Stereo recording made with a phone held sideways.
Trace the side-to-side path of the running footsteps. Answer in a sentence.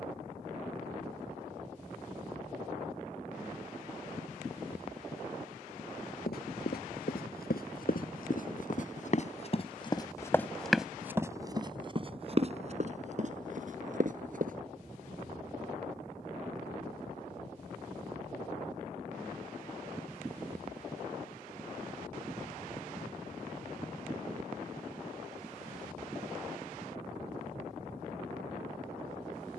In this clip you hear the running footsteps move to the right.